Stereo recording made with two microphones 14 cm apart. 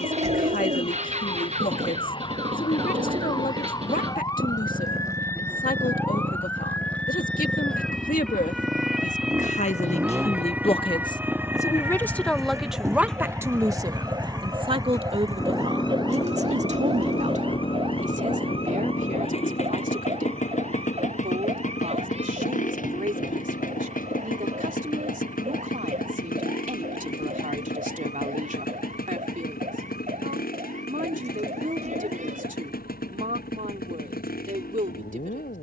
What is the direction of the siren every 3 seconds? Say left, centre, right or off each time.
left, left, centre, centre, right, right, right, right, right, right, right, right.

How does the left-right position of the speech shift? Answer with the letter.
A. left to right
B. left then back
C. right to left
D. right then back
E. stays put
A.